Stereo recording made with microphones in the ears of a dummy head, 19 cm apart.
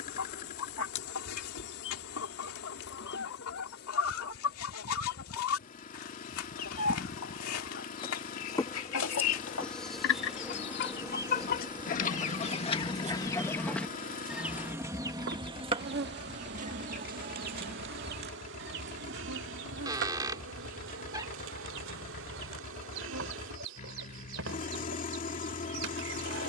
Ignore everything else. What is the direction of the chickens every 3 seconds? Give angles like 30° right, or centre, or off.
70° left, 70° left, 70° left, 50° left, 10° left, 30° right, 50° right, 60° right, 60° right.